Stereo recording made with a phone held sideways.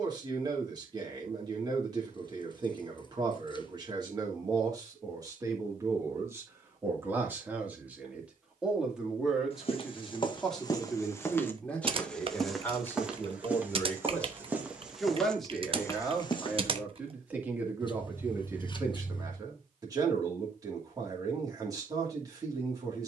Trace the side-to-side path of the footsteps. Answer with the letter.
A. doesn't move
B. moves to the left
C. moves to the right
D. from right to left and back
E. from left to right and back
E.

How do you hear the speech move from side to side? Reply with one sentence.
In this clip you hear the speech move from right to left and back again.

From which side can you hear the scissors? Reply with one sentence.
In this clip you hear the scissors on the left.